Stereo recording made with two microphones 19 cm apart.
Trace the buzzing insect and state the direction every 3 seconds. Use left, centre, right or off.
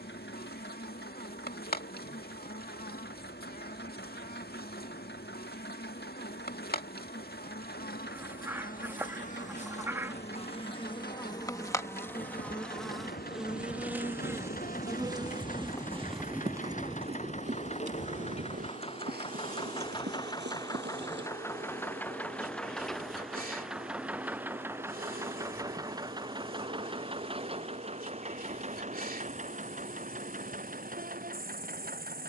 left, left, left, left, centre, right, right, right, right, right, right.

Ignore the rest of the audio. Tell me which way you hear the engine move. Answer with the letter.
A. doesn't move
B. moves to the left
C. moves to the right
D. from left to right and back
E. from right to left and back
C.